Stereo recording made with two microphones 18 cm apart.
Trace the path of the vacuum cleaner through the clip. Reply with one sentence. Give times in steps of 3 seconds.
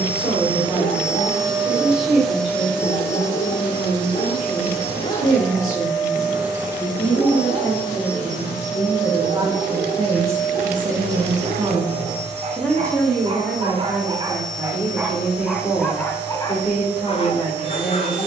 You can hear the vacuum cleaner in the centre from 0 s and on the left from 3 s.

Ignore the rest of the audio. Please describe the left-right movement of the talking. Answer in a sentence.
In this clip you hear the talking move from left to right and back again.